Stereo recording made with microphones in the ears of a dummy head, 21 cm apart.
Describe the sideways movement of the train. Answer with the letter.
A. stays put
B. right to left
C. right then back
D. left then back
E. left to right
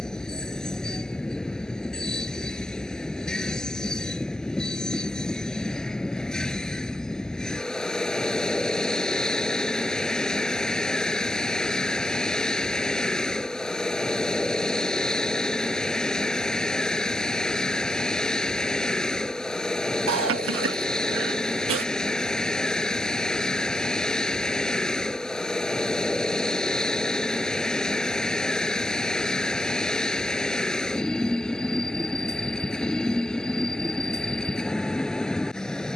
A.